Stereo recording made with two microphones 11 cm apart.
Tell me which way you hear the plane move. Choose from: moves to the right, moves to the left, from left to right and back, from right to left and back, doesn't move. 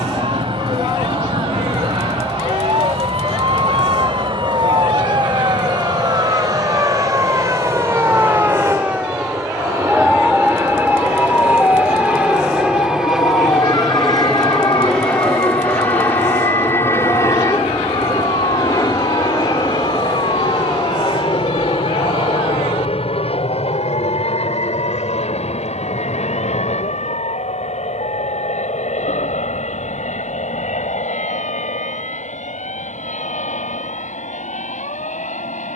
moves to the left.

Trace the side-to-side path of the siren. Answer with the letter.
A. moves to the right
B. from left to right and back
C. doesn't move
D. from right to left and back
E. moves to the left
E.